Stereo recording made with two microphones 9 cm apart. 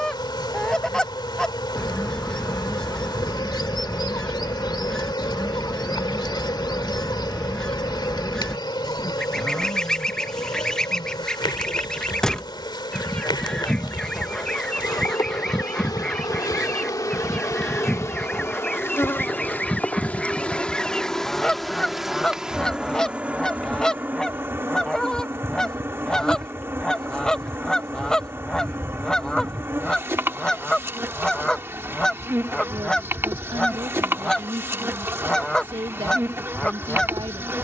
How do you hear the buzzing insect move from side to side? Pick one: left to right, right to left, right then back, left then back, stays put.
left to right.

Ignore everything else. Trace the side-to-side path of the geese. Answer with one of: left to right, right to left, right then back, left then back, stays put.
stays put.